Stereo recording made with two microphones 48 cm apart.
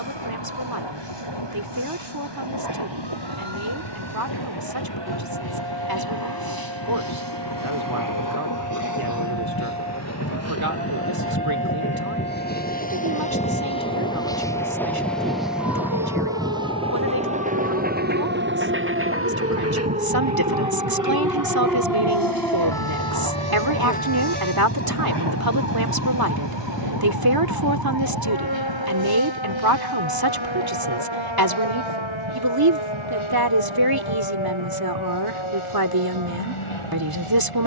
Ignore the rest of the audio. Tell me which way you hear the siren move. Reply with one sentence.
In this clip you hear the siren move from right to left.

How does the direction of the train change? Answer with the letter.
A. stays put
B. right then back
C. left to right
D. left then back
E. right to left
C.